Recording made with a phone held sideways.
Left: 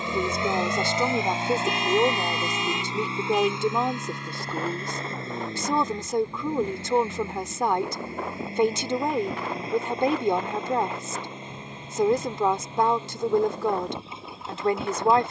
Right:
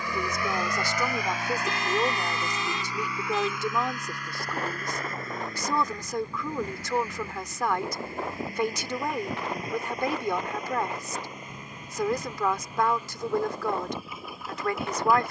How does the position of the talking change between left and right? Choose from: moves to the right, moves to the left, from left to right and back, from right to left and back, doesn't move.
doesn't move.